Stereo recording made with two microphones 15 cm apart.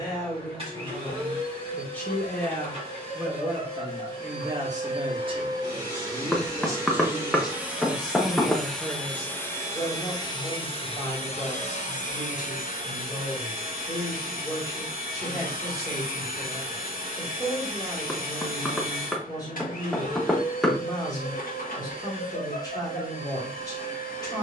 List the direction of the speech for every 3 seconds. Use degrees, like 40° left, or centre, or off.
20° left, 20° right, 10° right, 20° left, 20° left, 20° left, 20° left, 20° left.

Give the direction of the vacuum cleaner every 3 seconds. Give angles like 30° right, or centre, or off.
40° right, 30° right, 10° right, 30° left, 60° left, 60° left, 60° left, 60° left.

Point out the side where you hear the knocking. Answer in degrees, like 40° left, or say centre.
centre.